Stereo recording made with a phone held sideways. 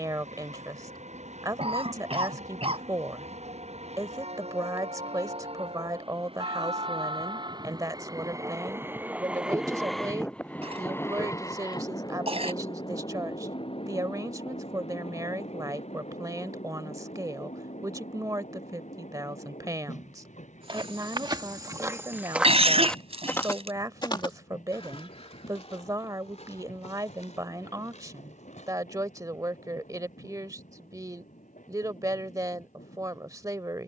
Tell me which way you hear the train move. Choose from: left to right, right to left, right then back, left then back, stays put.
right to left.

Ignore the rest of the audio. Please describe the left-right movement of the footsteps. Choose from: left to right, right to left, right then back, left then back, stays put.
right to left.